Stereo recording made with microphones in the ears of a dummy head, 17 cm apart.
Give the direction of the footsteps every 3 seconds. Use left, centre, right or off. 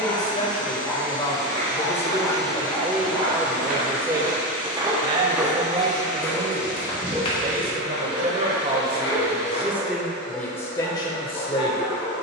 right, right, left, left.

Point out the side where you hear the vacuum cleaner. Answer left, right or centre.
left.